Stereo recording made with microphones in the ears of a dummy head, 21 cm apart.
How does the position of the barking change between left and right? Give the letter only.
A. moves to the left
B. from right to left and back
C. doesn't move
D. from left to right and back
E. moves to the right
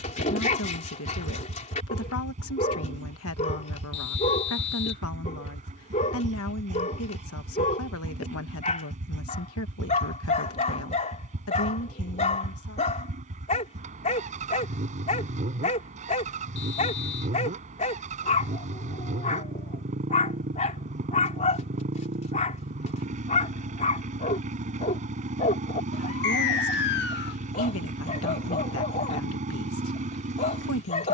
C.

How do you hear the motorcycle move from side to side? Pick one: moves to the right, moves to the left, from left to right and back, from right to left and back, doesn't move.
doesn't move.